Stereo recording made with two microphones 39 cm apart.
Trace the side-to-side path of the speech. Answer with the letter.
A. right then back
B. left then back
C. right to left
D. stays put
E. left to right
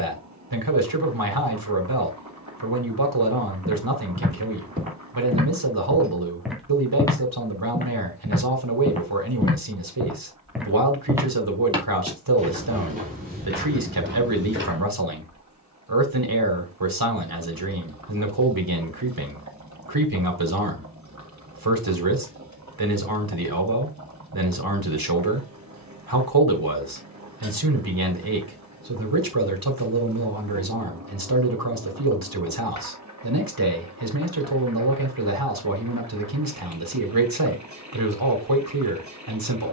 D.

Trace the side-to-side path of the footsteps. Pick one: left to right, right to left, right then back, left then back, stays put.
left then back.